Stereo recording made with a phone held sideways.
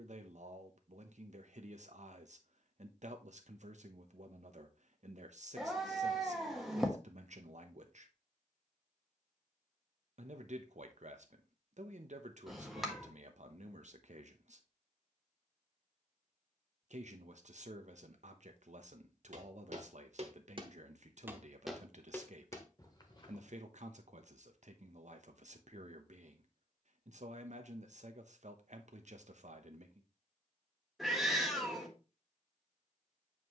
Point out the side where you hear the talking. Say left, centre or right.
right.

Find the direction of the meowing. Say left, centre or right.
centre.